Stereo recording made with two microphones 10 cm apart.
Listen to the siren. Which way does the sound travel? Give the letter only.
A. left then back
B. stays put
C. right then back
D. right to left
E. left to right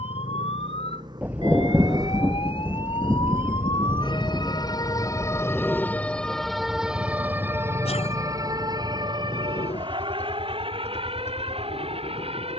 E.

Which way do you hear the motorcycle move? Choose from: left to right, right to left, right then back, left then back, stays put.
right to left.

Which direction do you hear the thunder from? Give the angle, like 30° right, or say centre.
10° right.